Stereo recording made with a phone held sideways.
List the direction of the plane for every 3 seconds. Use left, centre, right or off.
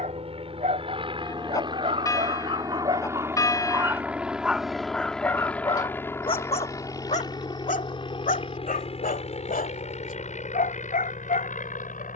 right, centre, left, left.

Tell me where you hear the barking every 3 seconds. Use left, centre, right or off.
right, centre, left, left.